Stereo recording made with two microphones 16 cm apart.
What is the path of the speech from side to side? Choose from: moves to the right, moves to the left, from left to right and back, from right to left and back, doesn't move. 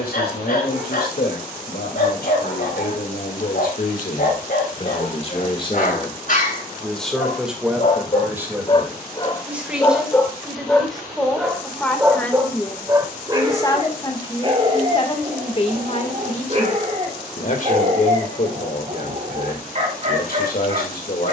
from left to right and back.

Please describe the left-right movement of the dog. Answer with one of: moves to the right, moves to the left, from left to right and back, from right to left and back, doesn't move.
moves to the right.